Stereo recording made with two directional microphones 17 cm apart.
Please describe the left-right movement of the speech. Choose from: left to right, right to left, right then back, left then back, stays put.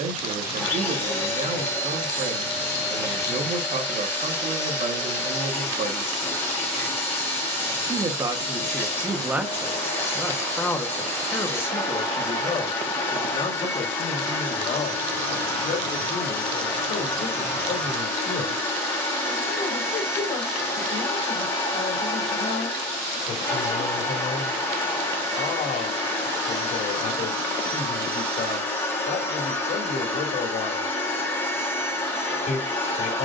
right to left.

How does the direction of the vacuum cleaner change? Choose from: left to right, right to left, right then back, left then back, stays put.
stays put.